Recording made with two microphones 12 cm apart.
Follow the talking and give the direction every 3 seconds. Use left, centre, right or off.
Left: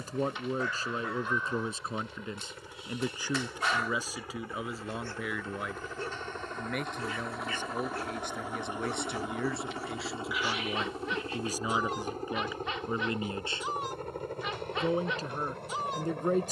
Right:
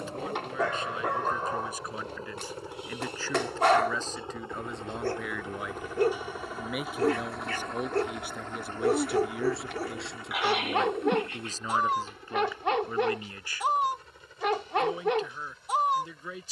left, centre, centre, centre, left, left.